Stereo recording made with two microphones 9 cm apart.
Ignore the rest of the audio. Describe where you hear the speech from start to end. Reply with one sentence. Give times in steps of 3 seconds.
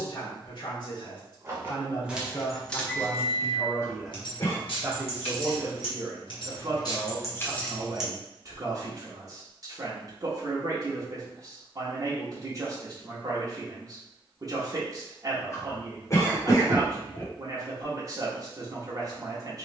You can hear the speech on the left from 0 s, in the centre from 3 s and on the right from 6 s.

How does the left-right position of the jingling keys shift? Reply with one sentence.
You can hear the jingling keys go left and come back.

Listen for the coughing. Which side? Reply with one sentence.
You can hear the coughing on the left.